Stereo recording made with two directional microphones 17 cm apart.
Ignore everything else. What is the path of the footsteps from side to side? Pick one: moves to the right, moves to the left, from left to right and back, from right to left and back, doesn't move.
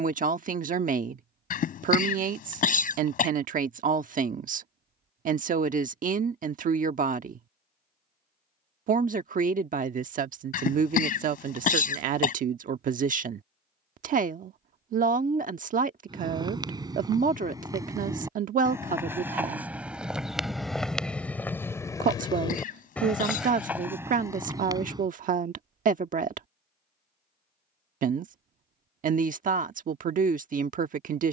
from right to left and back.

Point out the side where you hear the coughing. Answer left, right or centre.
left.